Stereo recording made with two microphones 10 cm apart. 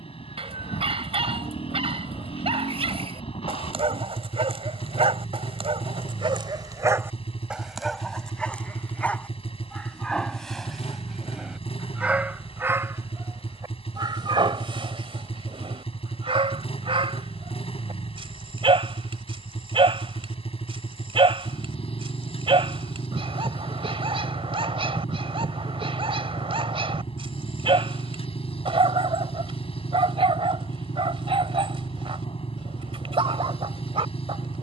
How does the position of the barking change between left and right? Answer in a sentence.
You can hear the barking go left and come back.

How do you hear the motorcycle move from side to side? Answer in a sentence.
You can hear the motorcycle stay in one place.